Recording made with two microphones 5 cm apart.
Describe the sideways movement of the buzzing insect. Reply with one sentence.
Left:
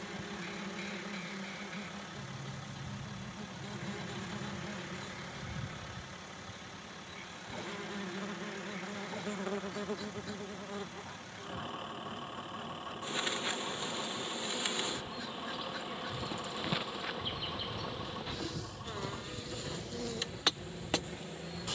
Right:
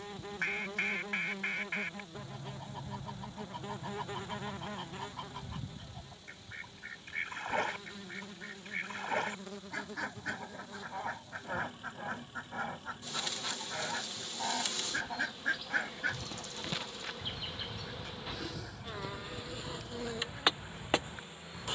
In this clip you hear the buzzing insect go left and come back.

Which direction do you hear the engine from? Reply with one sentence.
You can hear the engine on the left.